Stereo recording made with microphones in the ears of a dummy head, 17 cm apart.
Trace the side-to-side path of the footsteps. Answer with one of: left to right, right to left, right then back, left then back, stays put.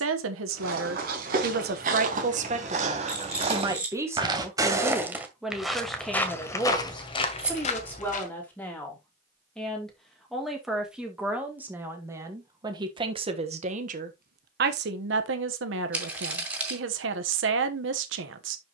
right to left.